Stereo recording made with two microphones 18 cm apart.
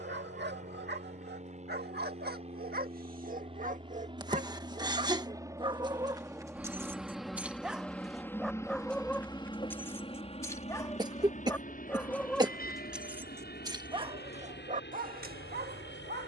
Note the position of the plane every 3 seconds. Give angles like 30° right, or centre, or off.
40° right, 30° right, centre, 30° left, 50° left, 60° left.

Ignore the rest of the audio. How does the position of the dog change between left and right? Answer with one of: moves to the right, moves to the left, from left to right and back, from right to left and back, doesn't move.
from right to left and back.